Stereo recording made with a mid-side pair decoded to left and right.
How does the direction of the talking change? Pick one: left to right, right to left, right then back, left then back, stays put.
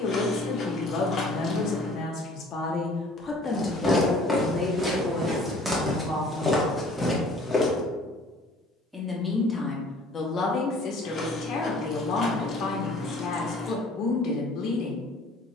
right then back.